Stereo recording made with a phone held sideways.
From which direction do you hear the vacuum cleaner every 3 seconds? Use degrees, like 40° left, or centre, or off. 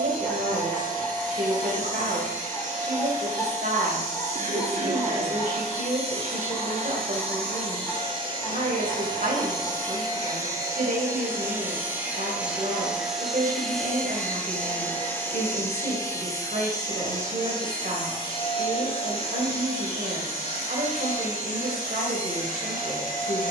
50° right, 50° right, 40° right, 20° right, centre, 20° left, 40° left, 50° left.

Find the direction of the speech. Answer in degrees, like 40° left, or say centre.
60° right.